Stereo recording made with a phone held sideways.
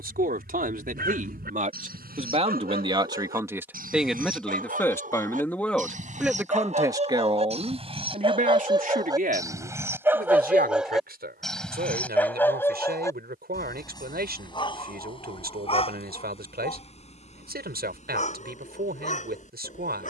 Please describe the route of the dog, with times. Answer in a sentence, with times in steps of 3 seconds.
In this clip you hear the dog on the right from 0 s, in the centre from 9 s and on the left from 12 s.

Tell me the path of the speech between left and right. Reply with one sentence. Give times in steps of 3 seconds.
In this clip you hear the speech on the right from 0 s, in the centre from 3 s and on the right from 6 s.